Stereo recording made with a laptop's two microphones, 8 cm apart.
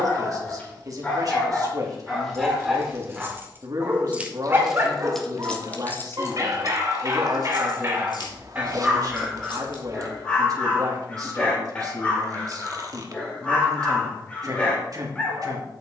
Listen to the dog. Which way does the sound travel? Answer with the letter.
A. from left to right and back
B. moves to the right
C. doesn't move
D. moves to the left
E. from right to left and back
A.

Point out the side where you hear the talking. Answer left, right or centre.
right.